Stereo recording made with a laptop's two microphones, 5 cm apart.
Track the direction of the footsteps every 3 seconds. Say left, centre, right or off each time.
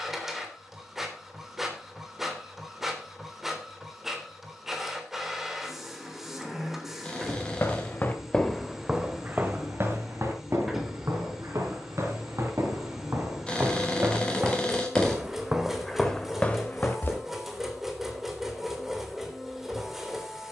off, off, left, right, right, centre, off.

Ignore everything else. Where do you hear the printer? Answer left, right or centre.
centre.